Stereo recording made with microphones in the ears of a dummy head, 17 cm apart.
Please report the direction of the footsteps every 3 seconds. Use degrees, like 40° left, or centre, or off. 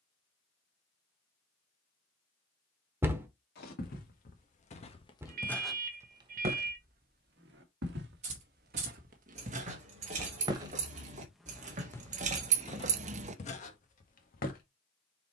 off, 30° left, 50° right, 20° right, 40° left.